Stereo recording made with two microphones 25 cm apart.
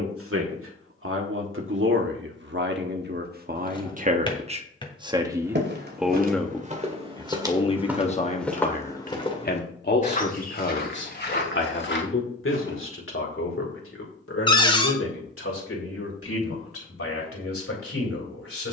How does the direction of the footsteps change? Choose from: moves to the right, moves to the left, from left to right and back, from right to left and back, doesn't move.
moves to the left.